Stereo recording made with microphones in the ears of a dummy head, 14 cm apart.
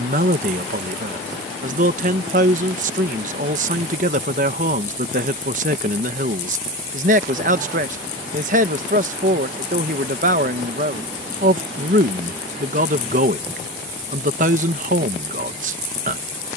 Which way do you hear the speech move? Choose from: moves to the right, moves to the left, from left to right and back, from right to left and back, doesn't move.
doesn't move.